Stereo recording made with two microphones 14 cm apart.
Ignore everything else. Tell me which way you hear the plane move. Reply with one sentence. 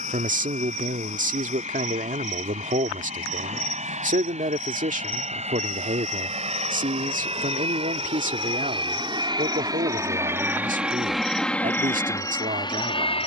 In this clip you hear the plane go from the right side to the left.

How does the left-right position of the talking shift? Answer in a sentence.
You can hear the talking stay put.